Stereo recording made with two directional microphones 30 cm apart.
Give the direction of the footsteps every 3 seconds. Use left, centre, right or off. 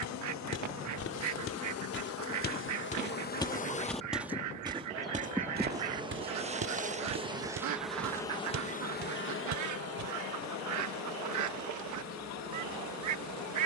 left, centre, right, right, off.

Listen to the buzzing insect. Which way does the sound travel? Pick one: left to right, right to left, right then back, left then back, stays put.
right then back.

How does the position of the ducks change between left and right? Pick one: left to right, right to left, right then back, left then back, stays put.
stays put.